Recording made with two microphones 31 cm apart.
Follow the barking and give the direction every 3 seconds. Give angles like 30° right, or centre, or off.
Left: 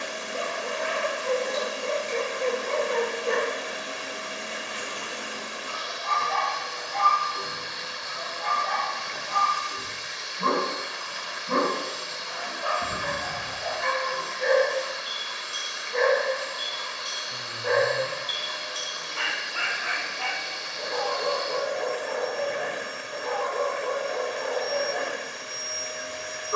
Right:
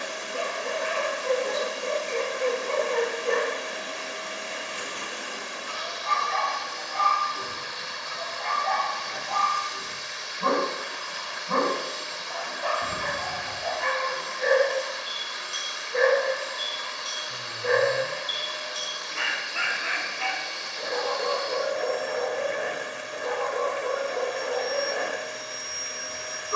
40° right, 30° right, centre, 30° left, 10° left, 20° right, 30° right, 30° right, 30° right.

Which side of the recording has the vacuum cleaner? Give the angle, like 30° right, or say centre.
20° left.